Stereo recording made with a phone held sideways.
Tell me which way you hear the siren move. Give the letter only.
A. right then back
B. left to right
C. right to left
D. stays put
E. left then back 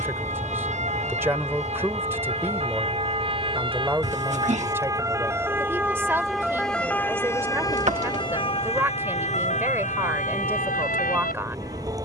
C.